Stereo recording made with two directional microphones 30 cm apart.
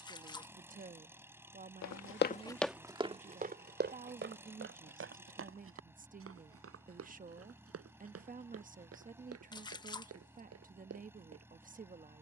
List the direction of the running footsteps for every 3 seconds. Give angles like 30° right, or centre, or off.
20° left, 40° right, 50° right, 50° right.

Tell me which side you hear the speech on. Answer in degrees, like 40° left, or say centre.
30° right.